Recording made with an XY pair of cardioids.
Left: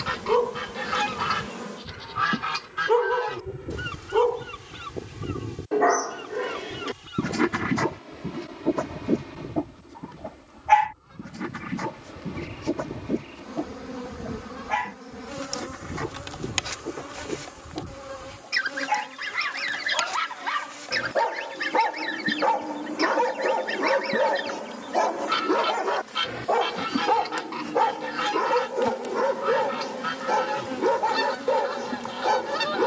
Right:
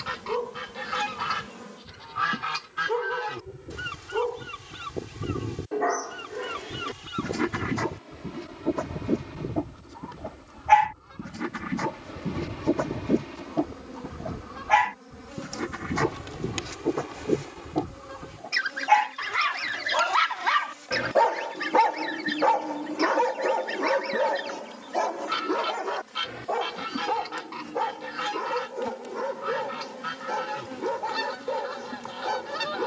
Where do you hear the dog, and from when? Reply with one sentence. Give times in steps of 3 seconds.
You can hear the dog on the left from 0 s, in the centre from 9 s, on the right from 12 s, in the centre from 21 s and on the left from 24 s.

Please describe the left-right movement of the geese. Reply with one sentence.
In this clip you hear the geese move from left to right and back again.